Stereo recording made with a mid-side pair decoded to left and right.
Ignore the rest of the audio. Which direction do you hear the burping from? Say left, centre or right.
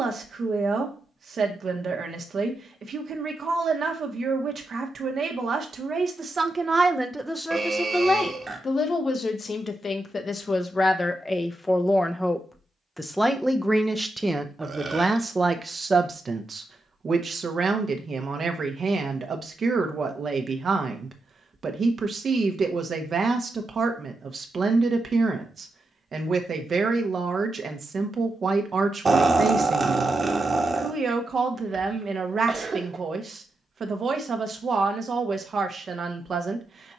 right.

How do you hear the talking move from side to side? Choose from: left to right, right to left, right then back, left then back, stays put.
left then back.